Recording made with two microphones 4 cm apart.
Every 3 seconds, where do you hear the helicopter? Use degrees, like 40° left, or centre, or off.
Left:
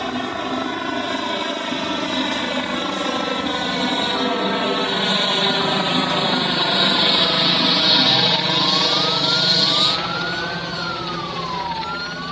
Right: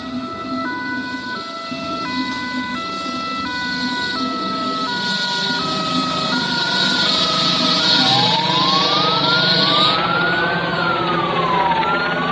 60° left, 40° left, 10° left, 20° right.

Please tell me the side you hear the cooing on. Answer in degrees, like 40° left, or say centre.
centre.